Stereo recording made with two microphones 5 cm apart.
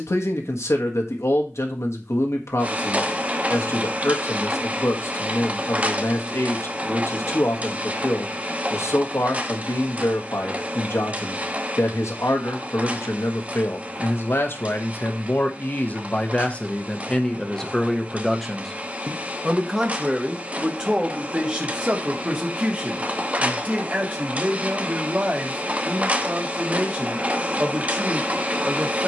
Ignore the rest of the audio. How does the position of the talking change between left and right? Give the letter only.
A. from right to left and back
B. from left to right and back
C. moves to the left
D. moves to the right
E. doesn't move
D.